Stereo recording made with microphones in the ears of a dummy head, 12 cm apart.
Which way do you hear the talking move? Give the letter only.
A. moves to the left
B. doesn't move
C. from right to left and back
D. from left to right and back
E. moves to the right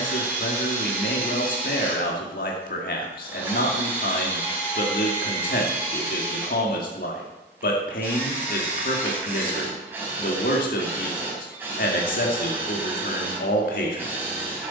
B.